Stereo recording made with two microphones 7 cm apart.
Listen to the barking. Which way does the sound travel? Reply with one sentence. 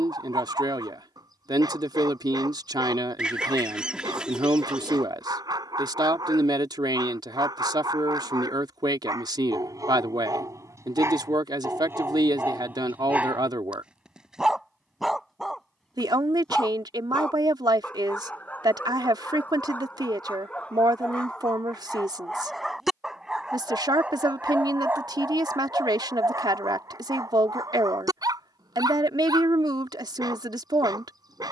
In this clip you hear the barking move from right to left and back again.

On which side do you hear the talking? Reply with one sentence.
In this clip you hear the talking on the right.